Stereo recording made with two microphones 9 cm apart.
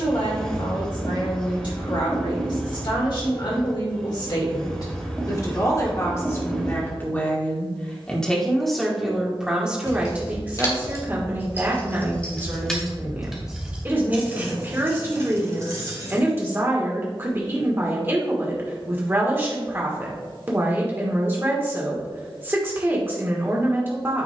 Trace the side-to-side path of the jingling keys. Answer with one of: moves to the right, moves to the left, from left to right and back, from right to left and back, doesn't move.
moves to the right.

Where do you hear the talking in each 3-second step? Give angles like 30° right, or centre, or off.
50° left, 40° left, 20° left, 20° right, 20° right, 20° right, 20° right, 20° right.